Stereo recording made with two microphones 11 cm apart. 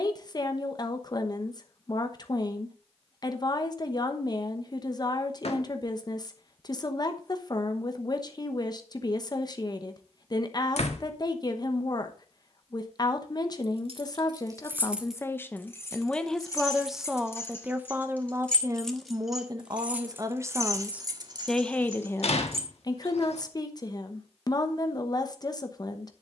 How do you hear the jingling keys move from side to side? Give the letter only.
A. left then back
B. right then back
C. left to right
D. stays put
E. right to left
A.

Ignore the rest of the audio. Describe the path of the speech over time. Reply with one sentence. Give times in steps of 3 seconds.
You can hear the speech on the left from 0 s, in the centre from 15 s, on the right from 18 s and on the left from 21 s.